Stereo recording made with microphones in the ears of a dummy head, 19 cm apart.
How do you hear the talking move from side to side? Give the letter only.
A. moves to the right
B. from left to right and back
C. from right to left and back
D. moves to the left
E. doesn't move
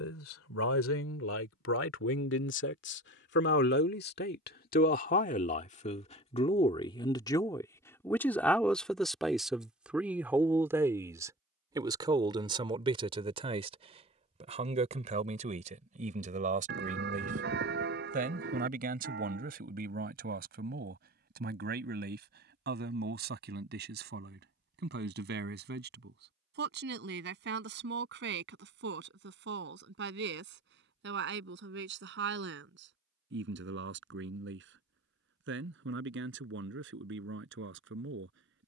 A.